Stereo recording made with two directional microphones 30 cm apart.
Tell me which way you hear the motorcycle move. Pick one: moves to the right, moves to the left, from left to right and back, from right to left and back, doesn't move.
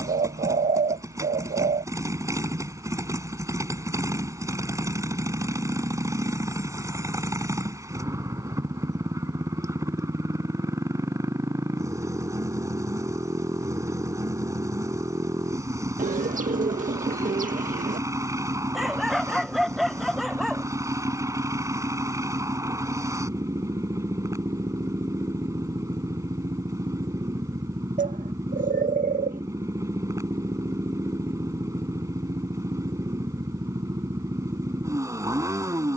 doesn't move.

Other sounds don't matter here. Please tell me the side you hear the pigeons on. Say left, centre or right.
right.